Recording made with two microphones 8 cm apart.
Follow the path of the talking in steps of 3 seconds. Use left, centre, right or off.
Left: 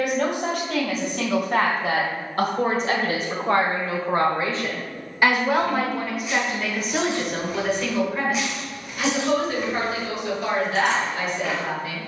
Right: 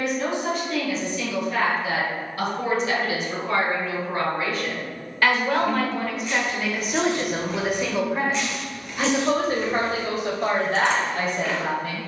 left, left, centre, right.